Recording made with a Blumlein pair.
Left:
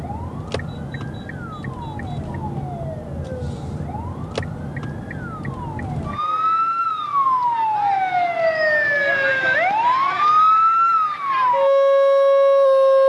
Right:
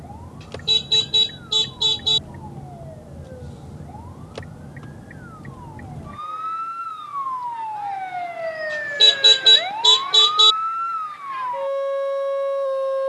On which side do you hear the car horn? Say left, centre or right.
right.